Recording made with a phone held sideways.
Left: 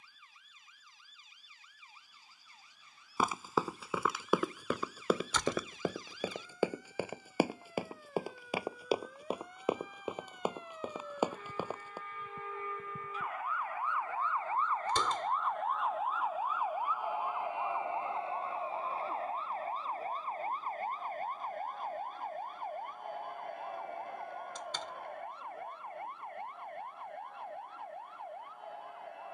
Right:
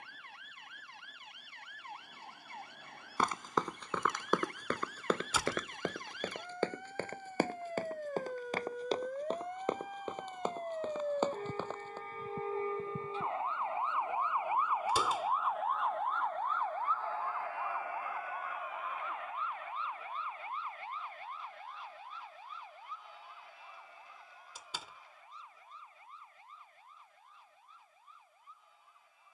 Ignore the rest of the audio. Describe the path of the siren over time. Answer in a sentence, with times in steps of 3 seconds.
In this clip you hear the siren on the right from 0 s, in the centre from 15 s and on the left from 18 s.